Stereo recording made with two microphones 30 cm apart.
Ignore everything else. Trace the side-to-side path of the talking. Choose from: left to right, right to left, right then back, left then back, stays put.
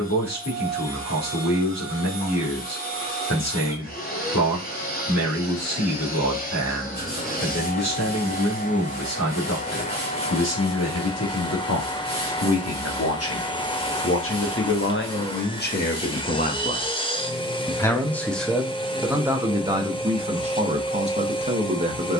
left to right.